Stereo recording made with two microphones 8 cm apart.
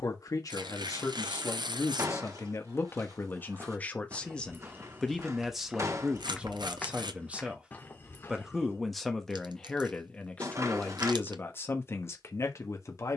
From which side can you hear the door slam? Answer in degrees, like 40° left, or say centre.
40° right.